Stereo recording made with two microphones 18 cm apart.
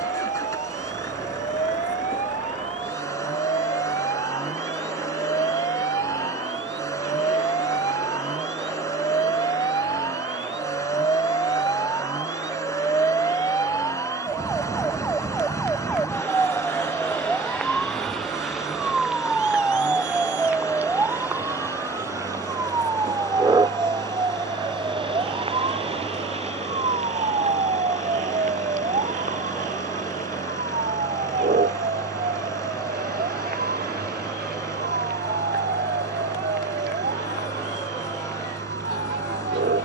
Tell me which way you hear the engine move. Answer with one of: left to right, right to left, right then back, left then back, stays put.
stays put.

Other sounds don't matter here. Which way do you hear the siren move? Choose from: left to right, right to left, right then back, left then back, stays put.
left to right.